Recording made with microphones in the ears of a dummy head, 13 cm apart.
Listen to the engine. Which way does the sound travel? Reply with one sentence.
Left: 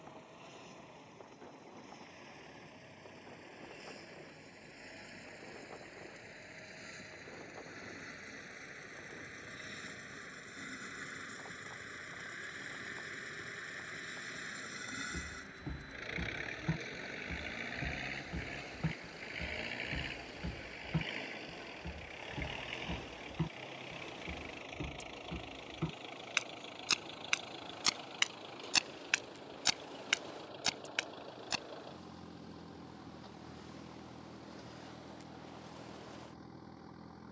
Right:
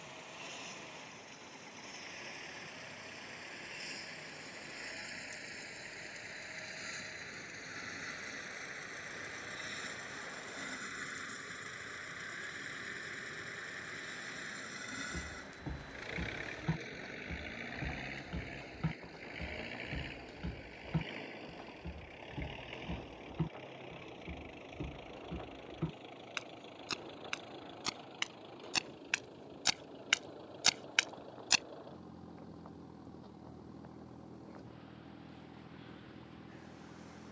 You can hear the engine go from the right side to the left.